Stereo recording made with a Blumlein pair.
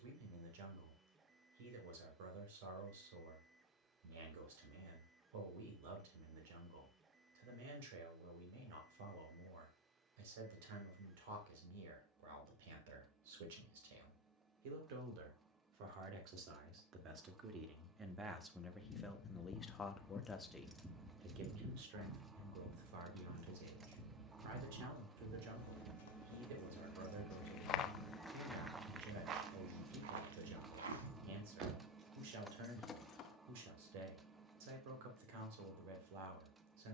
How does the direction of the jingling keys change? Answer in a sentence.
You can hear the jingling keys go right and come back.